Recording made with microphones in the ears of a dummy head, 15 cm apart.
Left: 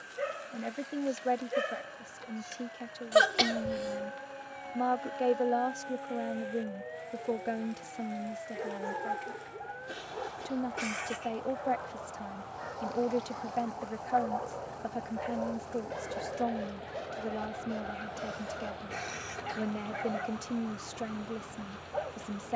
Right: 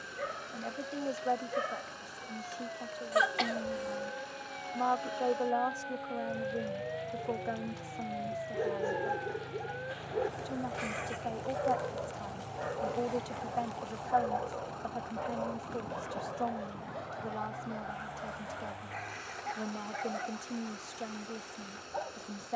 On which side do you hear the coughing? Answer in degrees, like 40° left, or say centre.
50° left.